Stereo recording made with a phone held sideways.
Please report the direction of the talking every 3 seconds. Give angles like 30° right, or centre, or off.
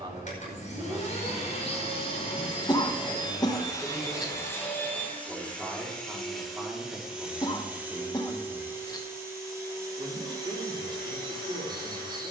20° right, centre, 10° right, 30° right.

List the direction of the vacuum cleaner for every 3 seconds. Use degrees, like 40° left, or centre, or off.
40° left, 20° left, 10° right, 20° right.